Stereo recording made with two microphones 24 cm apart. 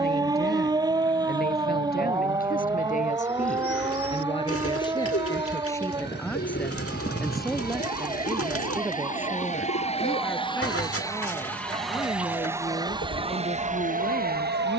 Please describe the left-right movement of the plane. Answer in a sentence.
In this clip you hear the plane travel towards the right.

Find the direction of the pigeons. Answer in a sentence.
You can hear the pigeons on the left.